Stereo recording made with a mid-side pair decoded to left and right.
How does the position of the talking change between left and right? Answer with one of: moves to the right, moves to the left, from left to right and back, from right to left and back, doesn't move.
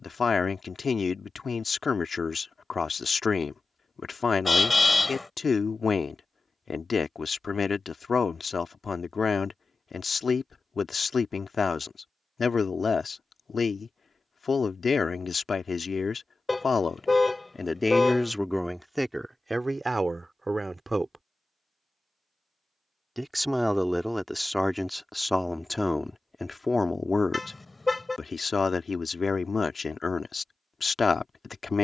from left to right and back.